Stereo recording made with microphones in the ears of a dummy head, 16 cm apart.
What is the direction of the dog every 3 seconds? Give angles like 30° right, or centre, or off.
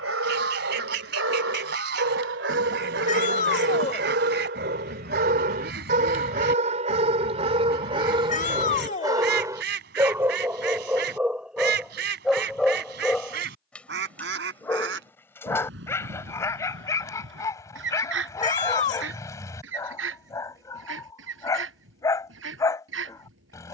80° right, 60° right, 30° right, 10° right, centre, 20° left, 20° left, 20° left.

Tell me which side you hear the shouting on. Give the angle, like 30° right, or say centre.
40° left.